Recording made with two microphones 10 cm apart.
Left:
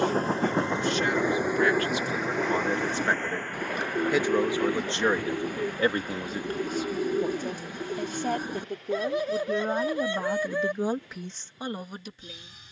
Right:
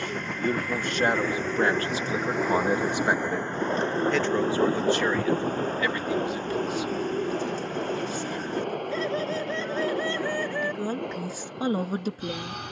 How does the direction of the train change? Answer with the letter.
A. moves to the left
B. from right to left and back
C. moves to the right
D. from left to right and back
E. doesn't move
C.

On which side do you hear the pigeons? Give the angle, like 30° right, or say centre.
10° left.